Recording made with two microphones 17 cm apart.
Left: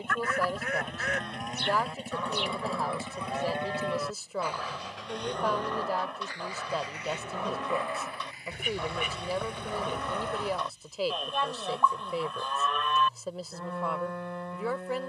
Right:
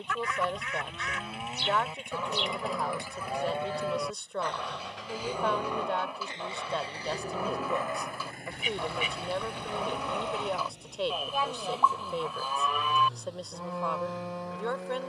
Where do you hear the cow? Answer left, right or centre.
centre.